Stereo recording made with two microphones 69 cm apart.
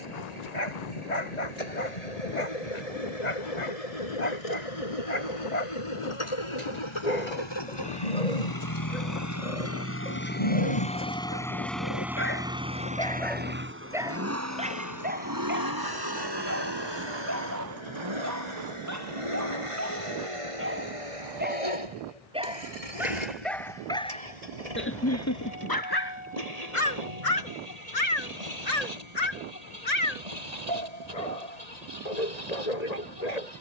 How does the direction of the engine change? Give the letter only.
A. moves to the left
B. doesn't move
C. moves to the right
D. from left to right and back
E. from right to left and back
C.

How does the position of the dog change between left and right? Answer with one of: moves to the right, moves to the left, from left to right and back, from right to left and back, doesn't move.
from left to right and back.